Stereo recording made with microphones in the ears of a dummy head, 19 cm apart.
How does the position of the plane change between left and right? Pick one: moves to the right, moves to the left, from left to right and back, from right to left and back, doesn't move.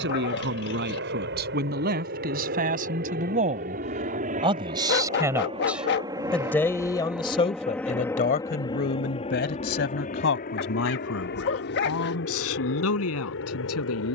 moves to the left.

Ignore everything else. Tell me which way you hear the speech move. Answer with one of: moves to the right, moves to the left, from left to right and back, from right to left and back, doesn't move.
moves to the left.